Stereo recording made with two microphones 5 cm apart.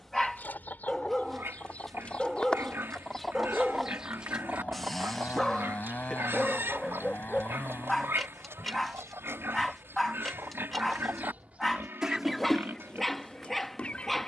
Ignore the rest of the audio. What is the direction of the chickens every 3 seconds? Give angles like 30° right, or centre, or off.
30° left, 20° right, 70° right, 60° right, 20° left.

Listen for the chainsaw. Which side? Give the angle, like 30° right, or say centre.
40° left.